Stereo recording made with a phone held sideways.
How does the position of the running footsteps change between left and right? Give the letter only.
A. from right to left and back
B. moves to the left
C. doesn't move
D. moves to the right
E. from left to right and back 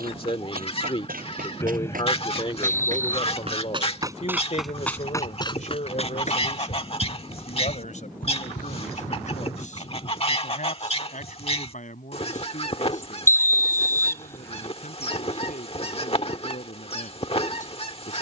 B.